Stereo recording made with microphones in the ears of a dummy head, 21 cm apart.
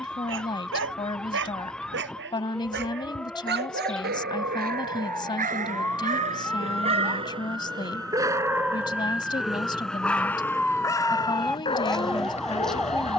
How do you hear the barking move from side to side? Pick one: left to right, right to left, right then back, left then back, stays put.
right to left.